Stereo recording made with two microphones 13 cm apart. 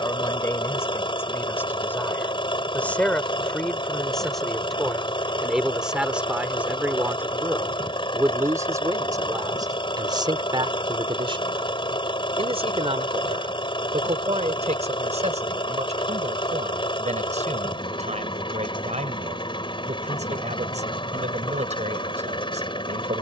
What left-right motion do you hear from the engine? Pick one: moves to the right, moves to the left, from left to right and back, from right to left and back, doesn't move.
doesn't move.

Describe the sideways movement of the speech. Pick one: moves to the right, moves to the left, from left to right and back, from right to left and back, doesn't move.
moves to the right.